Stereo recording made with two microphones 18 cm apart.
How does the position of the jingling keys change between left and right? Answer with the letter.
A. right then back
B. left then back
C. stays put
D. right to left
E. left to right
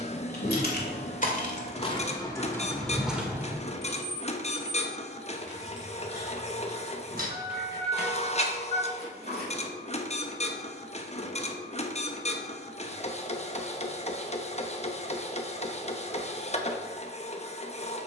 E.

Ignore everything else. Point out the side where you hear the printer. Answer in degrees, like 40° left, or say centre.
40° left.